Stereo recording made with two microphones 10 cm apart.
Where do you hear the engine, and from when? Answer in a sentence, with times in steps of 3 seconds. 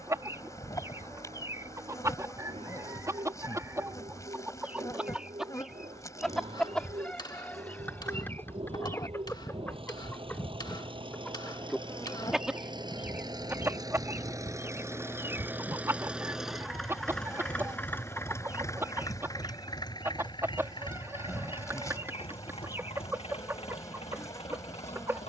In this clip you hear the engine on the right from 0 s, in the centre from 15 s and on the left from 18 s.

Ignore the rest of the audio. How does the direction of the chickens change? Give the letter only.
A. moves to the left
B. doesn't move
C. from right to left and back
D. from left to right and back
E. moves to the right
C.